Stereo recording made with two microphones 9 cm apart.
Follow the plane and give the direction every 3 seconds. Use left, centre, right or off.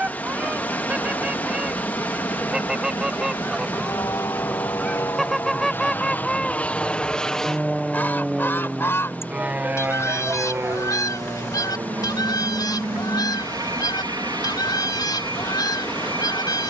left, left, centre, right, right, right.